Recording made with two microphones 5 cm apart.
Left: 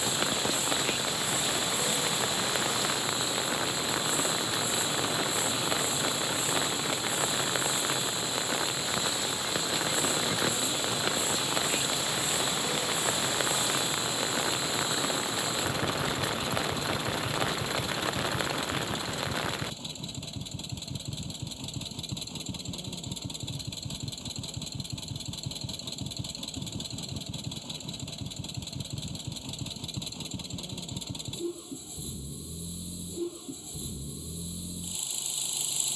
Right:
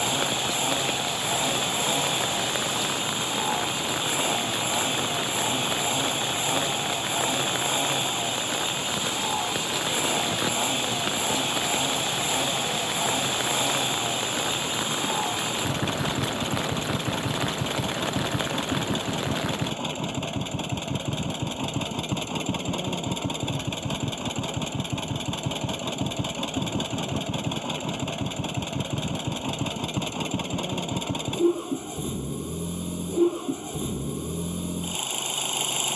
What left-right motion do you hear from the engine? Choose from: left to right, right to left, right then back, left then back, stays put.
stays put.